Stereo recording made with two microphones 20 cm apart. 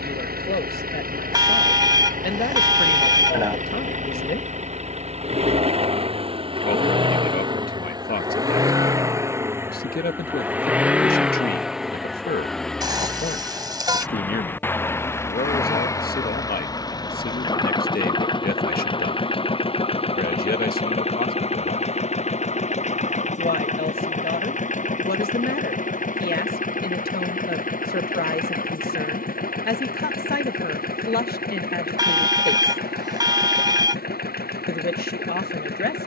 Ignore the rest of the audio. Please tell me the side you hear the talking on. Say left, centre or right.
left.